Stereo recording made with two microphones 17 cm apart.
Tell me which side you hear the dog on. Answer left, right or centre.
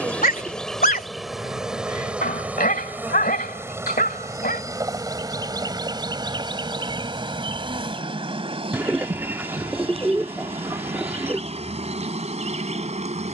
left.